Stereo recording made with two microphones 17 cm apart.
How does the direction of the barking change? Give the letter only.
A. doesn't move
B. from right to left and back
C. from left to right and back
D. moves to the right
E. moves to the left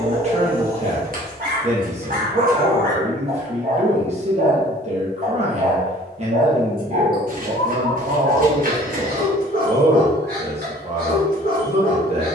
A.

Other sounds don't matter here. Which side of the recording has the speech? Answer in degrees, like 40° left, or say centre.
40° right.